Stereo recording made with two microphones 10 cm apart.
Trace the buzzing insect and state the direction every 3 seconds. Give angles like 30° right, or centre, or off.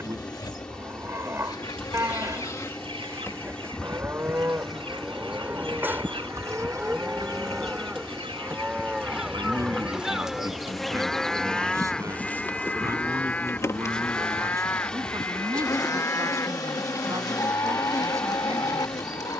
30° left, 10° left, 30° right, centre, 20° left, 30° left, 30° left.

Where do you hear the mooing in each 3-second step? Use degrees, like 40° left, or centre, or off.
20° right, 20° right, 10° right, centre, 20° left, 30° left, 40° left.